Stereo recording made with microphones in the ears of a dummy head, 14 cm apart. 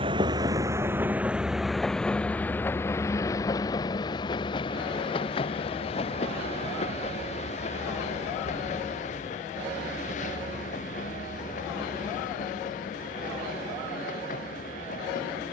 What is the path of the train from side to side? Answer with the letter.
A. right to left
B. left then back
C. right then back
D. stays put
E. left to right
A.